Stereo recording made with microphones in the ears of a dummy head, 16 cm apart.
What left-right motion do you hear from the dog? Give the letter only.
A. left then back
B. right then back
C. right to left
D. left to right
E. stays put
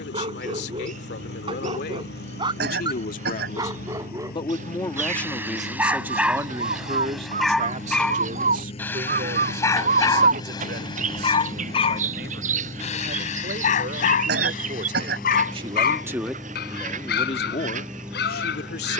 C.